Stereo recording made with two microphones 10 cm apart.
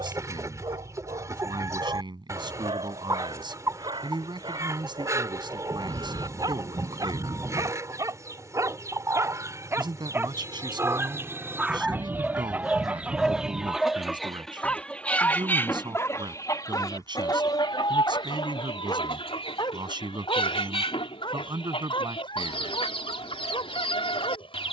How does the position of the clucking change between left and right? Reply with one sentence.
You can hear the clucking go from the right side to the left.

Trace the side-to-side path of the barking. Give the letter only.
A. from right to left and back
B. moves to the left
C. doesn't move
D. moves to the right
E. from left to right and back
B.